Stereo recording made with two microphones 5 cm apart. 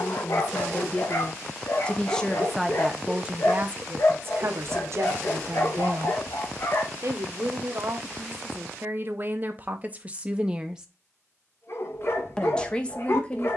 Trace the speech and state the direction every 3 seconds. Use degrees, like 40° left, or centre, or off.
20° left, 50° right, 50° right, 30° right, 20° left.